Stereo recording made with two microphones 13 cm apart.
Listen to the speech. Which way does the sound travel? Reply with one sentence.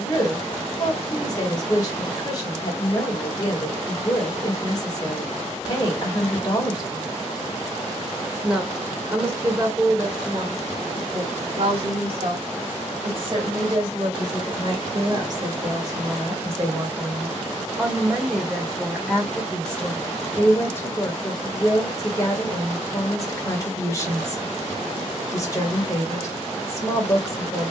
In this clip you hear the speech move from left to right and back again.